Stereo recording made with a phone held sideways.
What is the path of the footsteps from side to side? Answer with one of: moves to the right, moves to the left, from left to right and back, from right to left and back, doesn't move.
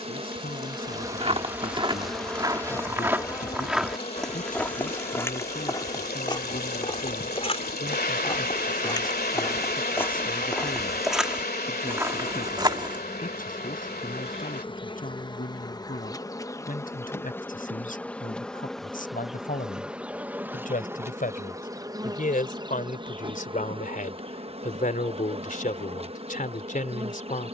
from right to left and back.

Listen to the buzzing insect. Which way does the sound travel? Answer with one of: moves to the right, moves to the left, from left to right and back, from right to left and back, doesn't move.
from right to left and back.